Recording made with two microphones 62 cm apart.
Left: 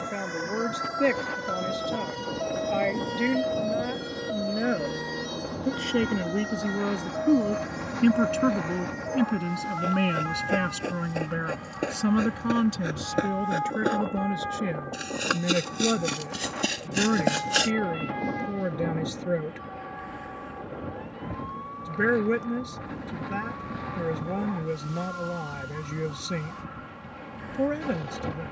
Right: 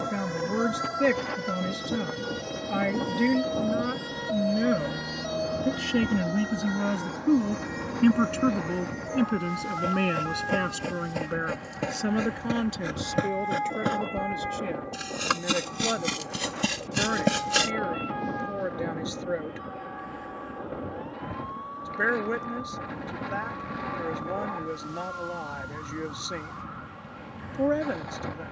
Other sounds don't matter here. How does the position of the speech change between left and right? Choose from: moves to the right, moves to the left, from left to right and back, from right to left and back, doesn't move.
moves to the left.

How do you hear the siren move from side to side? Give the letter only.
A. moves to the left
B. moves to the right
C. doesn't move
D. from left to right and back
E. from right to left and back
A.